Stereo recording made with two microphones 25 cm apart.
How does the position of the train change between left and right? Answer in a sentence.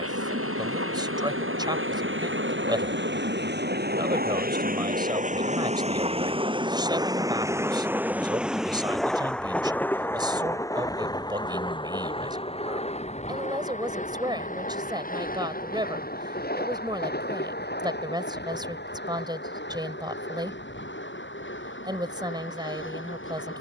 You can hear the train go from the right side to the left.